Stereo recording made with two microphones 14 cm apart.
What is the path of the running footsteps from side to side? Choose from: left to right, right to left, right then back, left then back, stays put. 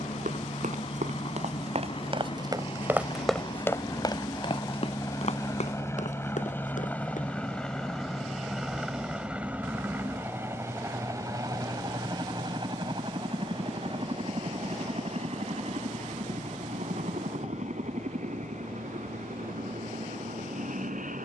right to left.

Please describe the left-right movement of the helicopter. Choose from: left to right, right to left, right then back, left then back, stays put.
left to right.